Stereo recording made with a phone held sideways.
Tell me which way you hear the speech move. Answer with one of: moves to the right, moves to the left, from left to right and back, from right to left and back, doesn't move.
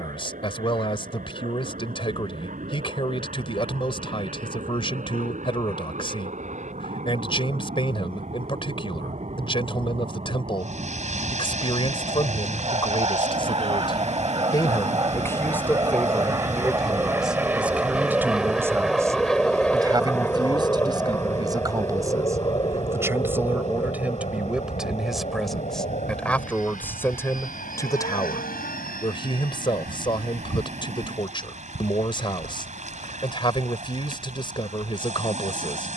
from left to right and back.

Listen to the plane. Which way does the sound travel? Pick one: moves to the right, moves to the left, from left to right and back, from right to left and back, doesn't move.
moves to the left.